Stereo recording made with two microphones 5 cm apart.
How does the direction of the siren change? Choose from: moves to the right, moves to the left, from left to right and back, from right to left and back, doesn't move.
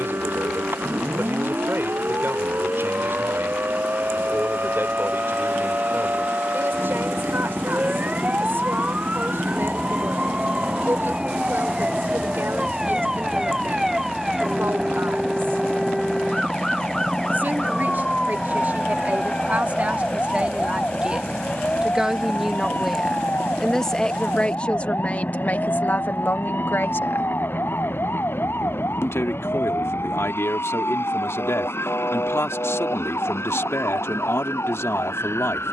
moves to the left.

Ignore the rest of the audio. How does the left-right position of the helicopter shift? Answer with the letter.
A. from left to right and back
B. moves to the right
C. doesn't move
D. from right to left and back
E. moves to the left
E.